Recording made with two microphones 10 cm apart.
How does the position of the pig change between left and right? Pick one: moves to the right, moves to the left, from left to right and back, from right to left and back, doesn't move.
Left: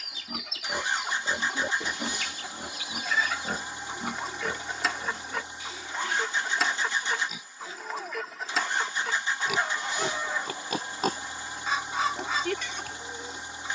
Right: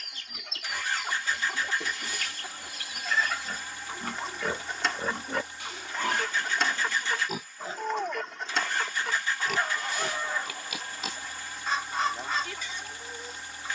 from left to right and back.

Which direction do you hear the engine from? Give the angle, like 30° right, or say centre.
20° left.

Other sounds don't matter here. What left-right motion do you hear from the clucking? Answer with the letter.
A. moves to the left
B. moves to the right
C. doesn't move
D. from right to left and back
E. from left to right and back
C.